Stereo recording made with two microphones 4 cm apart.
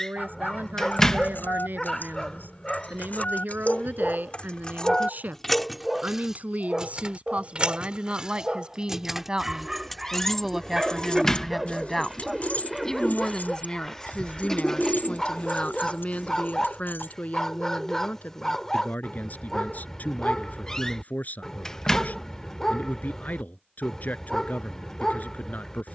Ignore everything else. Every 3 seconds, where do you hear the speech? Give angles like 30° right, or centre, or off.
70° right, 60° right, 40° right, 10° right, 20° left, 40° left, 50° left, 50° left, 50° left.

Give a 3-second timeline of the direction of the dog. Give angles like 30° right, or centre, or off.
20° left, 10° left, 10° right, 10° right, 10° left, 20° left, 20° left, 20° left, 20° left.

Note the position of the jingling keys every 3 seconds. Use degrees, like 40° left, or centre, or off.
70° left, 30° left, 20° right, 10° left, 60° left, 70° left, off, off, off.